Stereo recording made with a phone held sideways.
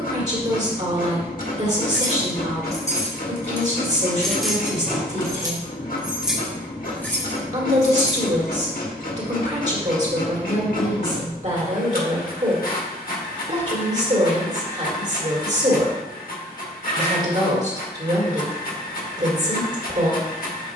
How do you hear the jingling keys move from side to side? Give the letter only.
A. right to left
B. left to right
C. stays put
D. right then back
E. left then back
D.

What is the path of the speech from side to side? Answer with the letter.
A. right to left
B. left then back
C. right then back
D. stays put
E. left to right
D.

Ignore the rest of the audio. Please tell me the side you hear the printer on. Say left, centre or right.
left.